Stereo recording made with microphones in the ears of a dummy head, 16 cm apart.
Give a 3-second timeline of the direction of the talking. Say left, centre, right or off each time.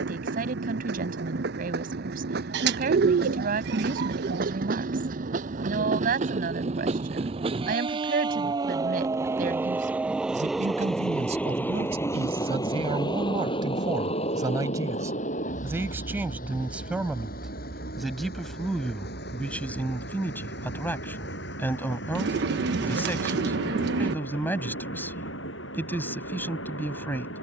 right, right, right, right, right, centre, centre, centre, centre.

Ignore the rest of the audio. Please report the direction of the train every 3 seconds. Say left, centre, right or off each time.
right, right, right, centre, left, left, left, left, left.